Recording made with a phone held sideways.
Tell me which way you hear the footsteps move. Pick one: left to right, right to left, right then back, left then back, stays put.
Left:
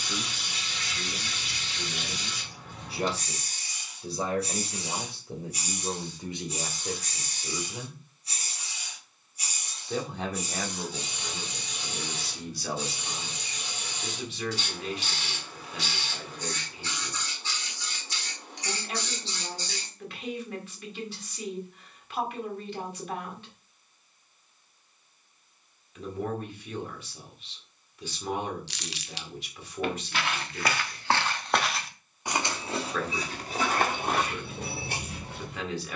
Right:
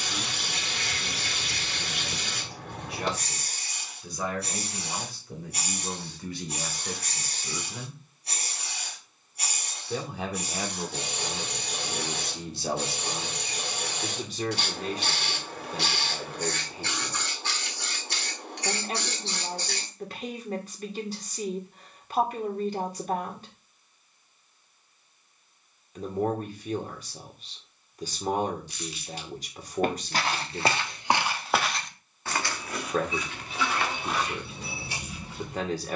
right to left.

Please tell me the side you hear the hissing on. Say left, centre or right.
right.